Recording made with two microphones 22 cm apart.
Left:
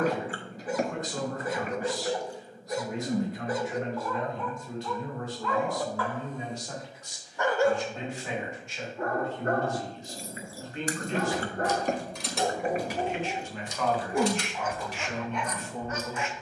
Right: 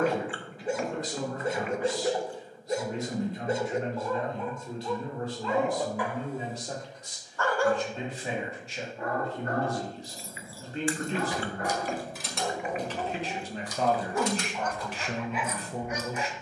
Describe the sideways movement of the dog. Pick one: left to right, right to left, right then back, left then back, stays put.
left then back.